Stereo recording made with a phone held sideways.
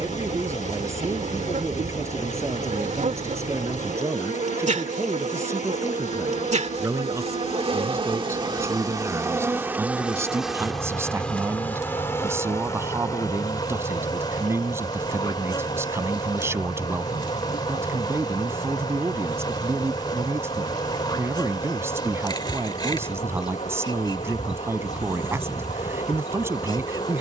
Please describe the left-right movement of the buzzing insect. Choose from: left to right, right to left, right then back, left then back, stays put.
right to left.